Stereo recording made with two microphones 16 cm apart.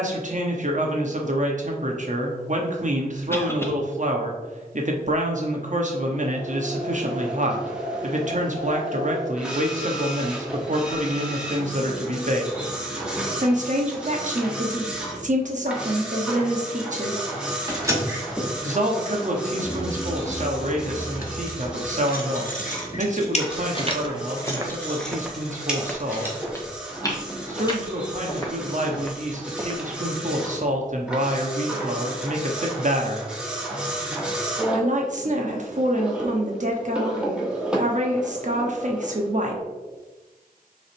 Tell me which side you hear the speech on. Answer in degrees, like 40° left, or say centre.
50° right.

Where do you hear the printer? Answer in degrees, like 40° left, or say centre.
10° right.